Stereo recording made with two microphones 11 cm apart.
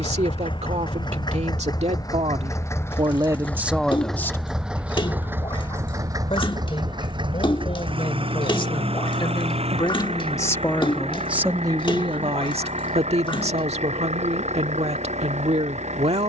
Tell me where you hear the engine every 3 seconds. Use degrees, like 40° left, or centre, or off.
40° left, centre, 50° right, 60° right, 70° right, 80° right.